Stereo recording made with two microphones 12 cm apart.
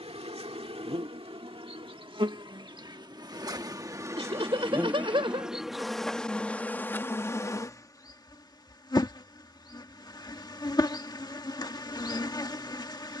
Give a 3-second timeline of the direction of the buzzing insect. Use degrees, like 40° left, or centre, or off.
50° right, 20° right, 20° left, 40° left, 40° left.